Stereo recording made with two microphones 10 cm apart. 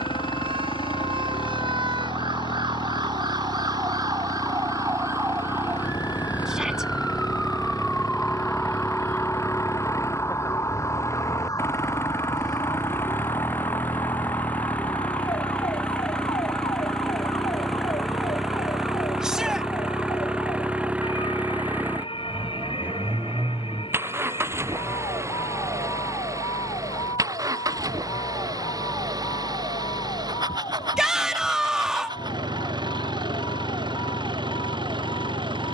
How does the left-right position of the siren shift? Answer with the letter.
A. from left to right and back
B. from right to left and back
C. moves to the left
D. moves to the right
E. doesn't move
C.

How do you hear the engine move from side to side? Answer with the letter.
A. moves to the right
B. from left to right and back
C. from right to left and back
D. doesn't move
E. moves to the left
A.